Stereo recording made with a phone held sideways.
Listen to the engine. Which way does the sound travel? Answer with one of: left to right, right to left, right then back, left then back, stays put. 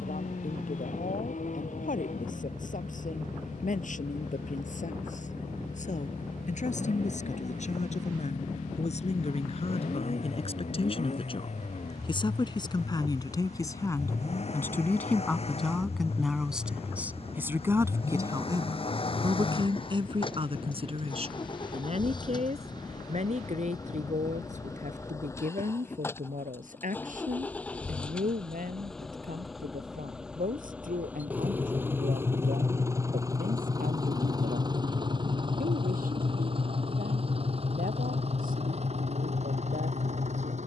left to right.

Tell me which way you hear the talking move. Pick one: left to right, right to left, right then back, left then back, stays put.
left to right.